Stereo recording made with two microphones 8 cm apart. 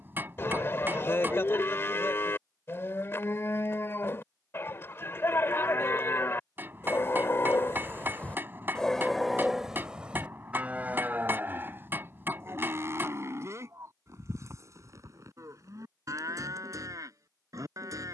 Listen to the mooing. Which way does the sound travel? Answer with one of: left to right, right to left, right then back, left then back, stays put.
left to right.